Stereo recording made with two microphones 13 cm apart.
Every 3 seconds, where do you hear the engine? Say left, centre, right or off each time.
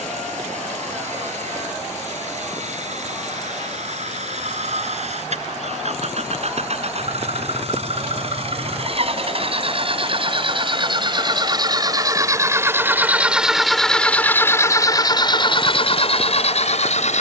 right, right, right, right, centre, left.